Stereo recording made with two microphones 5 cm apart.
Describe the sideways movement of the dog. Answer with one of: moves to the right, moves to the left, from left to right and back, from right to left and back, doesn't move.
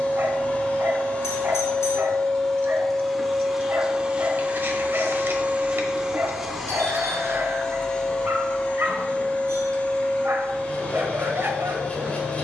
doesn't move.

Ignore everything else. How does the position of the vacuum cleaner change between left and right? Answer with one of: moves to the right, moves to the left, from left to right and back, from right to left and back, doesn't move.
from left to right and back.